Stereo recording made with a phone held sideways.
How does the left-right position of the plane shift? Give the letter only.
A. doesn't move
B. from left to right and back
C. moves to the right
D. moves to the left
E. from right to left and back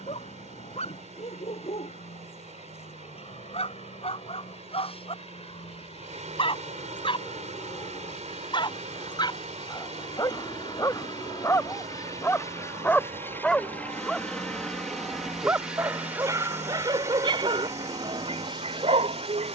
C.